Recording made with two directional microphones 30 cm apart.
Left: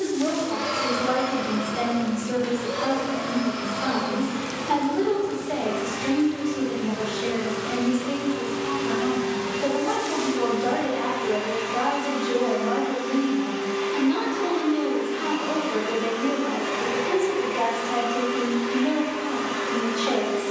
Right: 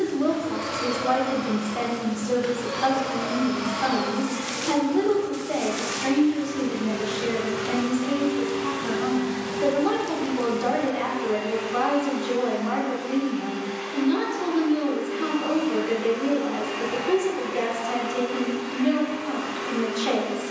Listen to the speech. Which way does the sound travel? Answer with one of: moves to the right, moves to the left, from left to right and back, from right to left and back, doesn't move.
doesn't move.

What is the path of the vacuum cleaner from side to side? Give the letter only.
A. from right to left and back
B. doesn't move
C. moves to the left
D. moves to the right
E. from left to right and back
E.